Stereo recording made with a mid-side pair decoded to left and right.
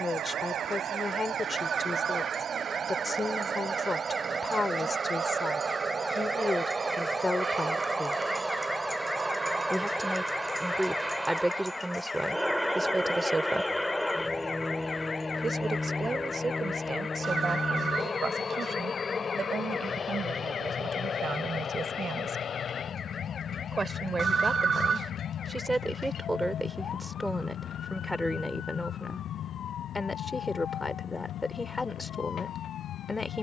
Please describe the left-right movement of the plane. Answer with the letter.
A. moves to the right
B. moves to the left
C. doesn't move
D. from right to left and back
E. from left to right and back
B.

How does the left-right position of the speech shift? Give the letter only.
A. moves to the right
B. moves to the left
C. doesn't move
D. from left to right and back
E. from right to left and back
D.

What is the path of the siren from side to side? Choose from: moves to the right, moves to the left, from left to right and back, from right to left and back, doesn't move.
moves to the left.